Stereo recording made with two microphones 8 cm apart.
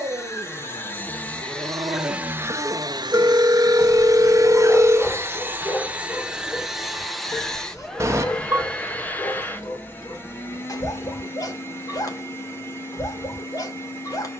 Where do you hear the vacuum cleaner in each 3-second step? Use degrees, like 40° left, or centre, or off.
centre, 40° right, centre, 30° left, 30° left.